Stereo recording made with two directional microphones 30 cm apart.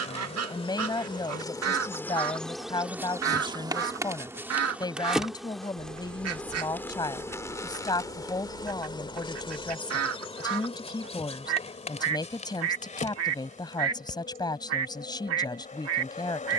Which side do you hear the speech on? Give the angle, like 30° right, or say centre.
10° left.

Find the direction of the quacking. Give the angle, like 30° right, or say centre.
50° right.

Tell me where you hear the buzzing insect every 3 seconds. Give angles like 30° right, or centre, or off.
10° left, 10° right, 10° left, 20° left, 20° left, 20° left.